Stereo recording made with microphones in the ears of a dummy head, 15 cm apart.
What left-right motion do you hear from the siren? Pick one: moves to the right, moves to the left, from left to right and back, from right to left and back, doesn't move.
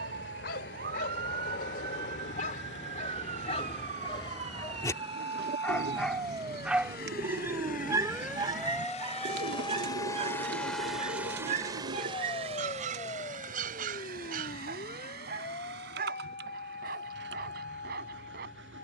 moves to the left.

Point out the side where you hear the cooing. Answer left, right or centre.
right.